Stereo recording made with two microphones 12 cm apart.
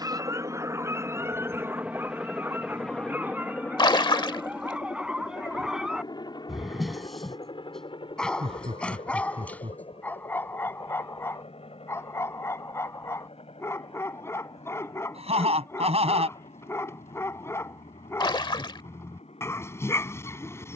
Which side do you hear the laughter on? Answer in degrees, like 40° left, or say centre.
70° right.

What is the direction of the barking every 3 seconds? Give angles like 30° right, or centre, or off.
20° right, 10° right, centre, 20° left, 20° left, 20° left, 20° left.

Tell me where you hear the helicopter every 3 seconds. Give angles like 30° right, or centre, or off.
20° right, 20° left, 40° left, 50° left, 60° left, 60° left, 60° left.